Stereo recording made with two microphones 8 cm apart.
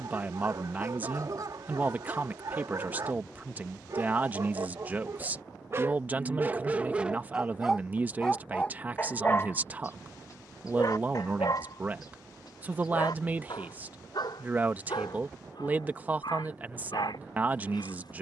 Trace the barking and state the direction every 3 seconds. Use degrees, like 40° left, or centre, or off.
50° right, 40° right, 10° right, 50° left, 70° left, 80° left.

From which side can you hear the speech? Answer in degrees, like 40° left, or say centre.
20° right.